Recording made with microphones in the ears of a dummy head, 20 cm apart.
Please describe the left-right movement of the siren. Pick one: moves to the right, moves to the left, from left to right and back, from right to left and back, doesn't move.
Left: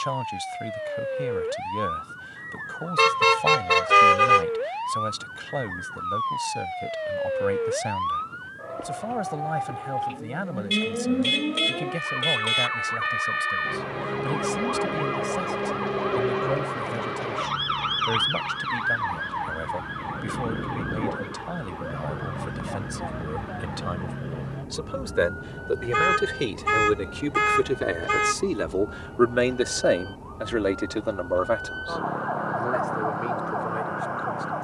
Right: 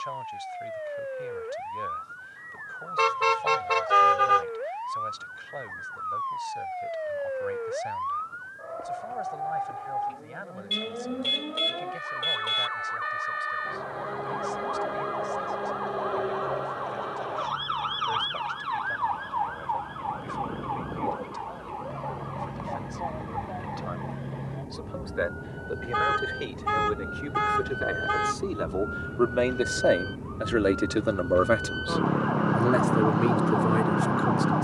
moves to the right.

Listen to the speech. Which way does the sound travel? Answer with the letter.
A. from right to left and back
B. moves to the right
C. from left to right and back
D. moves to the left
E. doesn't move
B.